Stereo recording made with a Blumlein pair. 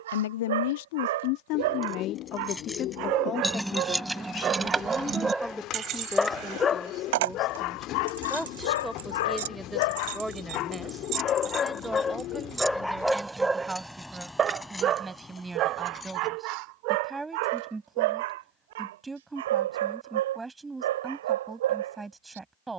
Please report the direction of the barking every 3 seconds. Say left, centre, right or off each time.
right, right, left, left, centre, right, right, right.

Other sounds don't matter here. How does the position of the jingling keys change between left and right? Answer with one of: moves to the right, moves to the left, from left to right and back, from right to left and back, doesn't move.
from left to right and back.